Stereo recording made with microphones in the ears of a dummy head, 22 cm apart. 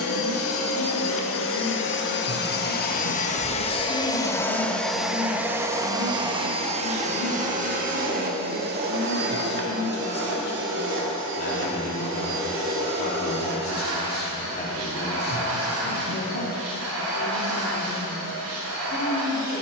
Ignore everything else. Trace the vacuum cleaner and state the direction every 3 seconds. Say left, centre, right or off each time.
left, centre, right, right, right, right, right.